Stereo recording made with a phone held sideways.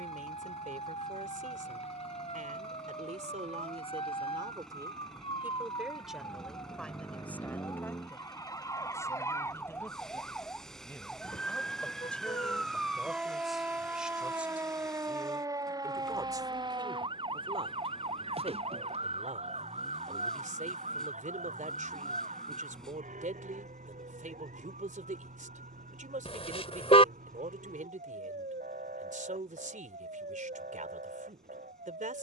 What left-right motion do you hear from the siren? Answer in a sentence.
In this clip you hear the siren travel towards the right.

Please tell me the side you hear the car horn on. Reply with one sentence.
In this clip you hear the car horn on the left.